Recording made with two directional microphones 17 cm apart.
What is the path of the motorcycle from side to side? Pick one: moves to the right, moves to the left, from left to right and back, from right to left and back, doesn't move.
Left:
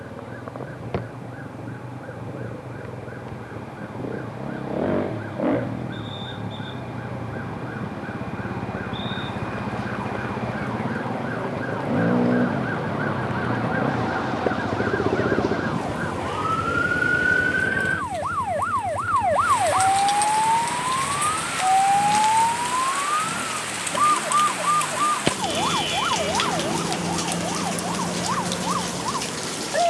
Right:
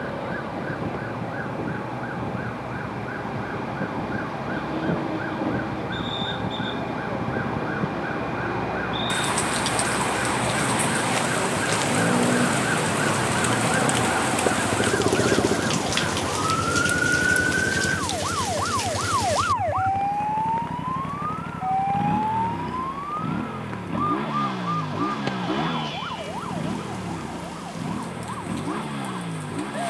moves to the right.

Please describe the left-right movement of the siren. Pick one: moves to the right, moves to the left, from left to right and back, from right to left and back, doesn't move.
moves to the left.